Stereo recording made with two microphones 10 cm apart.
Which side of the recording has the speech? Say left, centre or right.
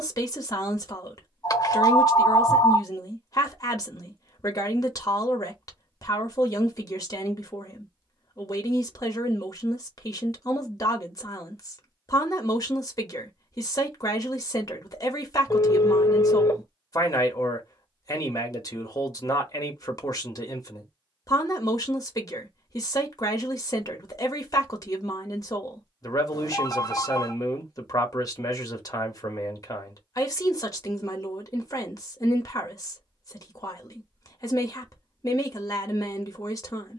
left.